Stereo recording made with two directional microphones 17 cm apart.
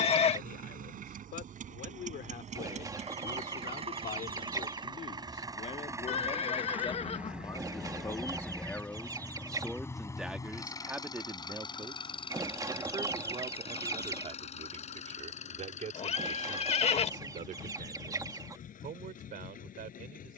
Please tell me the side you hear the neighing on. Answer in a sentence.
You can hear the neighing on the left.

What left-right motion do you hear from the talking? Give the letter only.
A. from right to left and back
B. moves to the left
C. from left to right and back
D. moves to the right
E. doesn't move
D.